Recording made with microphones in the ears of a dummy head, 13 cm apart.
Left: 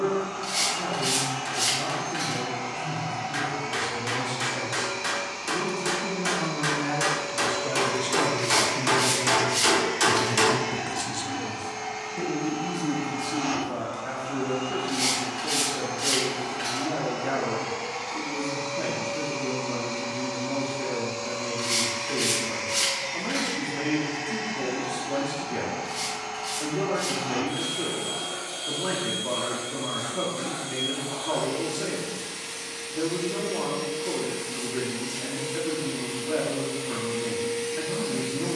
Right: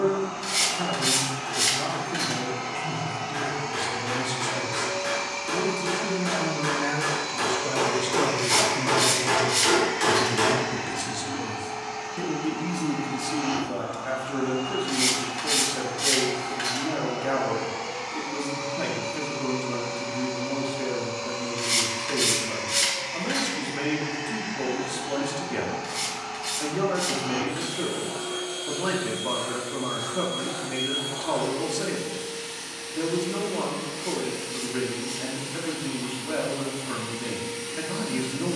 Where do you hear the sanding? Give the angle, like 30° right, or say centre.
20° right.